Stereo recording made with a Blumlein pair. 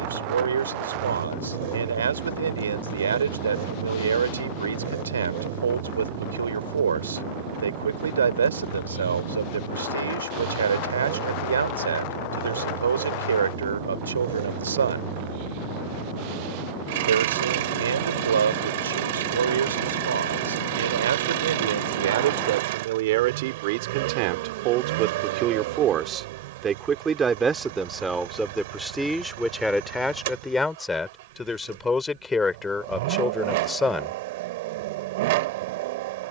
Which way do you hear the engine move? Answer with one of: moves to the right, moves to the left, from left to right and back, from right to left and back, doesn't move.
doesn't move.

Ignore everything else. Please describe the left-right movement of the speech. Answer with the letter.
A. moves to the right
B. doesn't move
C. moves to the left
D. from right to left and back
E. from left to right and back
C.